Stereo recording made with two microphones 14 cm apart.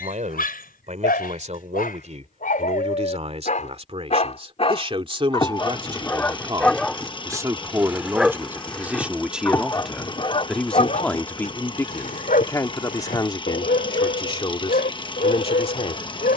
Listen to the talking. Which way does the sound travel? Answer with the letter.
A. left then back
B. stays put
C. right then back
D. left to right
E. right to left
E.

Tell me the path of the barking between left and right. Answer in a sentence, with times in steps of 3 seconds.
You can hear the barking on the left from 0 s, in the centre from 6 s and on the left from 9 s.